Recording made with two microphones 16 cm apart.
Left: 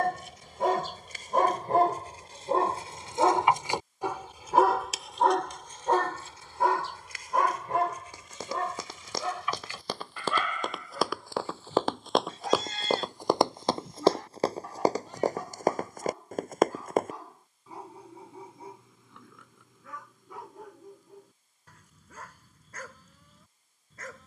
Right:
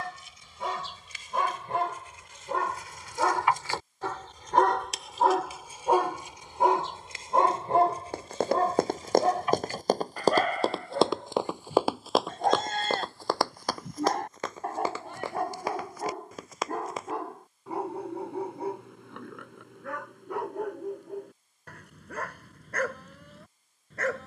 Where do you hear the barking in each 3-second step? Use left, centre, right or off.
left, centre, right, right, right, right, right, right.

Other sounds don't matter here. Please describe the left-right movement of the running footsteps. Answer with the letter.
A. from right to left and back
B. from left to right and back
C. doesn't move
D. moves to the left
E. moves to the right
D.